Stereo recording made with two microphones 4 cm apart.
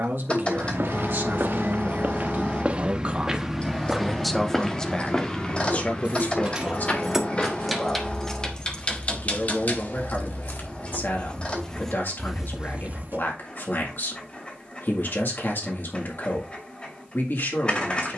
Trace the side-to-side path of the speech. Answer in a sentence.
You can hear the speech travel towards the left.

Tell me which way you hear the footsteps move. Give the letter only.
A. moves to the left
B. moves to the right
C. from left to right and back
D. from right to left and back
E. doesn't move
D.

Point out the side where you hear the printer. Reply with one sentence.
In this clip you hear the printer on the left.